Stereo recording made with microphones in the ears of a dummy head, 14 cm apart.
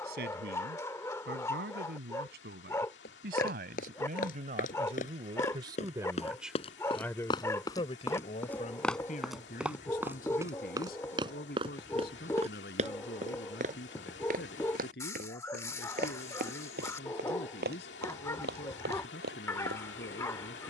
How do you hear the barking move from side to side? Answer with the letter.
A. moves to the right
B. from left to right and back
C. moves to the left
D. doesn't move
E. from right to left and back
D.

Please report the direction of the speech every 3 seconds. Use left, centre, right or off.
right, right, left, left, left, left, left.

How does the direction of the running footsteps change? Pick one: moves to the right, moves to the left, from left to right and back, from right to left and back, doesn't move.
moves to the right.